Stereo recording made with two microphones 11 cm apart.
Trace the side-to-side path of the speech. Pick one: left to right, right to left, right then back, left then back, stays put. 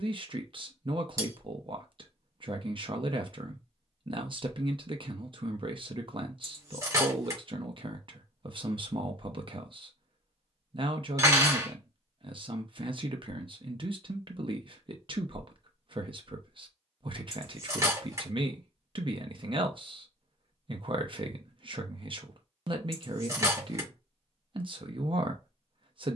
stays put.